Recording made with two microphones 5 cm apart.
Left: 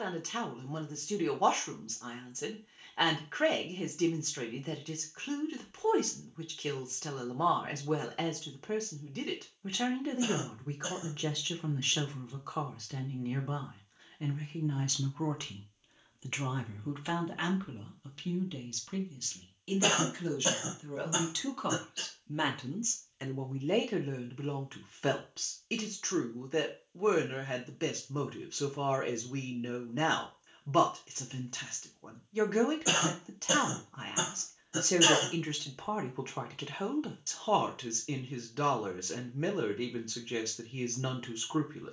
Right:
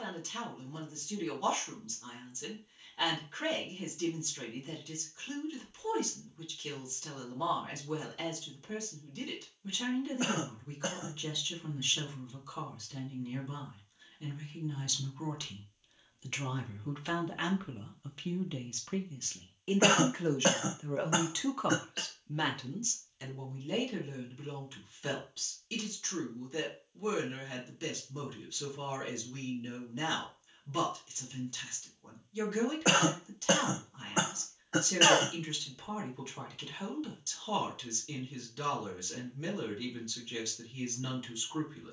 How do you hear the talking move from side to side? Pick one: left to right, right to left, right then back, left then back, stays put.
right then back.